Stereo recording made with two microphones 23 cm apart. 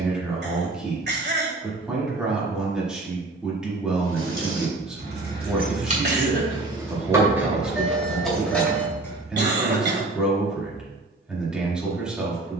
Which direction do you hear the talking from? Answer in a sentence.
You can hear the talking in the centre.